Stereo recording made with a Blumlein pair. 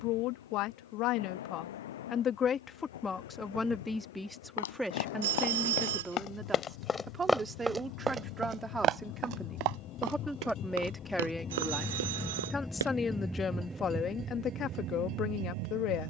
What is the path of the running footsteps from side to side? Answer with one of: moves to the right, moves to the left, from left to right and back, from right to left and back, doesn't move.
moves to the right.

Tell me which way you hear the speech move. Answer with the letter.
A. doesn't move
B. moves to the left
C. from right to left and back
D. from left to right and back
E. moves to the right
D.